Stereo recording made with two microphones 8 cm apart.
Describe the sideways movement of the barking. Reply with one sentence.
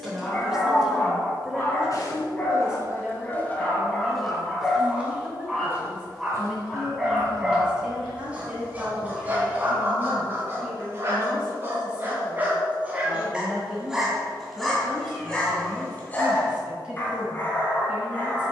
You can hear the barking go right and come back.